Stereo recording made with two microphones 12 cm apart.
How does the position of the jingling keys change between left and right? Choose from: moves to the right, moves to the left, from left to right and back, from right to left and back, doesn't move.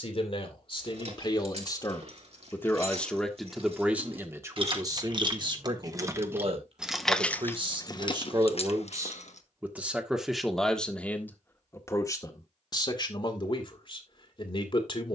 moves to the left.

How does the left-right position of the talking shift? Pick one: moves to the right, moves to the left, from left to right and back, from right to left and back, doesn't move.
from left to right and back.